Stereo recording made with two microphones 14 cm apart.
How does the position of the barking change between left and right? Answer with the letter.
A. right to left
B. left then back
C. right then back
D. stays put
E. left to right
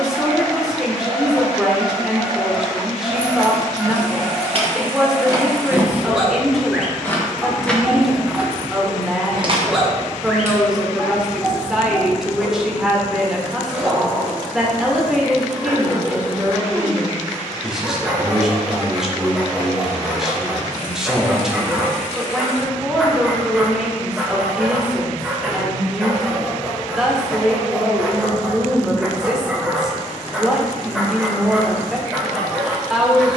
D.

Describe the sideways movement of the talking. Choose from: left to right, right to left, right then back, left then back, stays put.
stays put.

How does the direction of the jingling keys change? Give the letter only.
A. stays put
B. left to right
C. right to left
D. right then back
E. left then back
E.